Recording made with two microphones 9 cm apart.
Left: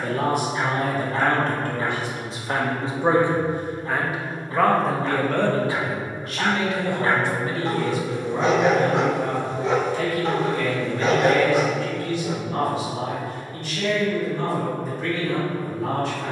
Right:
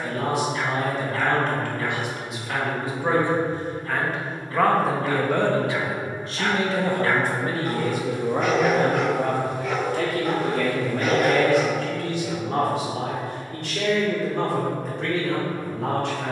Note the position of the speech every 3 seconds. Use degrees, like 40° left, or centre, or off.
40° left, centre, 40° right, 70° right, 80° right, 80° right.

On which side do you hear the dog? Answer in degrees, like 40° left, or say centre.
20° left.